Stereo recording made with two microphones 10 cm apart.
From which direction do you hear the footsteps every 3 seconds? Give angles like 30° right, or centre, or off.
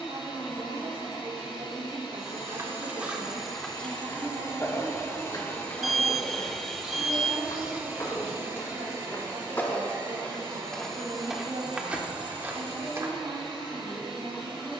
30° right, 20° left, 40° left, 10° left, 20° right.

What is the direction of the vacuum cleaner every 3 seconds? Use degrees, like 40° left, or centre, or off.
70° left, 40° left, 10° right, 50° right, 60° right.